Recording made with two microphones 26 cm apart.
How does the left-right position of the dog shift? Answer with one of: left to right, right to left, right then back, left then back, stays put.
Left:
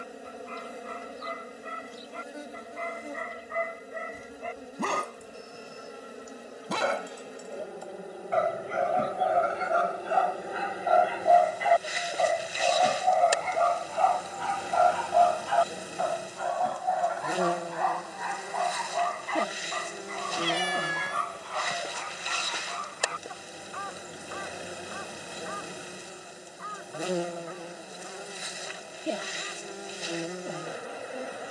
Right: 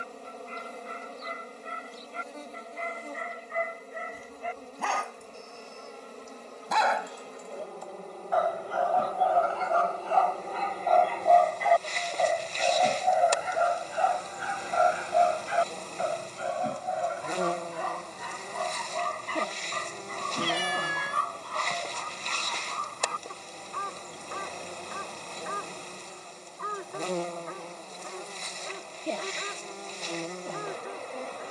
left to right.